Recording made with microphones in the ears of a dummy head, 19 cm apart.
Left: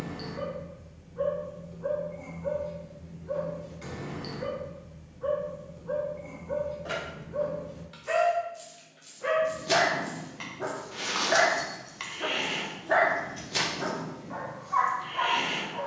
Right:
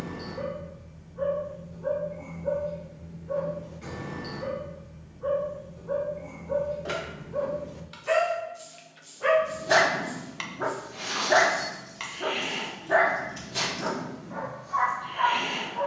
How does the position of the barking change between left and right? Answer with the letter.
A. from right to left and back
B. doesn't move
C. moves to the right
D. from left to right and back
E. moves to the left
D.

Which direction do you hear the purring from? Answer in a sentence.
You can hear the purring on the left.